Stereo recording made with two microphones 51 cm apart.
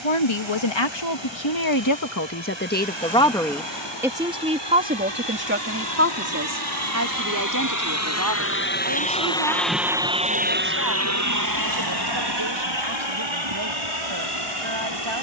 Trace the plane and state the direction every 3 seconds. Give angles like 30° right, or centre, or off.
70° left, 60° left, 40° left, 20° right, 60° right.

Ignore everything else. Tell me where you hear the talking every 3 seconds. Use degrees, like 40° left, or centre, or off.
40° left, 10° right, 30° right, 40° right, 50° right.